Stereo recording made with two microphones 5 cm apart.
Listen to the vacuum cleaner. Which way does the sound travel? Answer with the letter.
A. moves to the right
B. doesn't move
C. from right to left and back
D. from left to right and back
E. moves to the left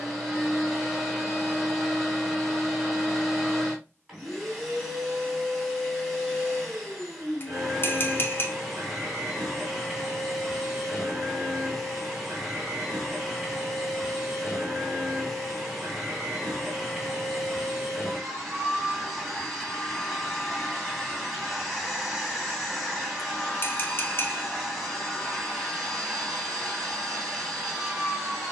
B.